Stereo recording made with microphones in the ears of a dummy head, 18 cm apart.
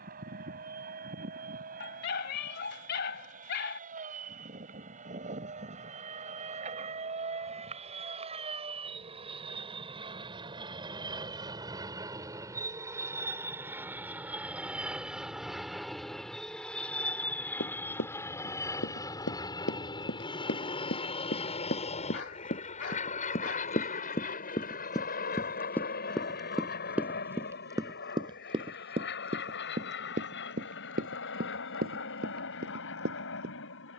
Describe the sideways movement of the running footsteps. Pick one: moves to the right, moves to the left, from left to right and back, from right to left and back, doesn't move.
moves to the right.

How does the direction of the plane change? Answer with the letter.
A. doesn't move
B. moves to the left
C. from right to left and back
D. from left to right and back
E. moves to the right
B.